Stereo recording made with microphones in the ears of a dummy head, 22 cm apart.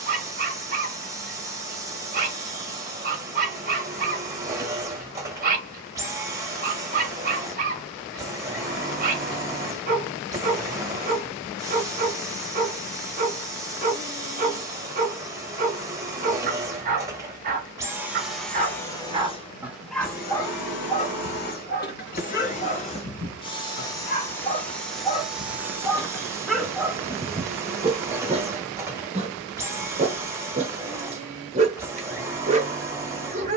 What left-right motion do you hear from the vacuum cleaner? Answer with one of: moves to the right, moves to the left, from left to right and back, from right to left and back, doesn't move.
from right to left and back.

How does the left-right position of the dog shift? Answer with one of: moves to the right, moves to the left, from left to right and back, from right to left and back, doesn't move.
from right to left and back.